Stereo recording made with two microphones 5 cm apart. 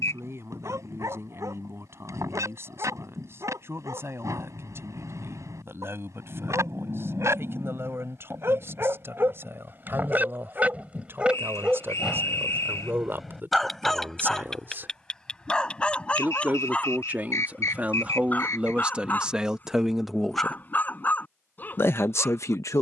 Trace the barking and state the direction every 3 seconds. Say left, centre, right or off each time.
right, right, right, right, centre, left, left, left.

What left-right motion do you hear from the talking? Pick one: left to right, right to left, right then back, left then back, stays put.
right to left.